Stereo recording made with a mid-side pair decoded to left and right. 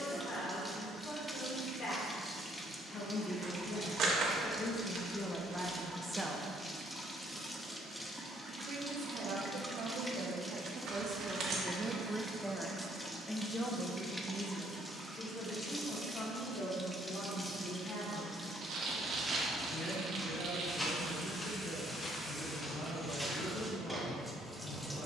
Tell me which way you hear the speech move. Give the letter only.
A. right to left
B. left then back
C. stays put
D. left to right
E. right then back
E.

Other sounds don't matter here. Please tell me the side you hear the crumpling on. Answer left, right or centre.
right.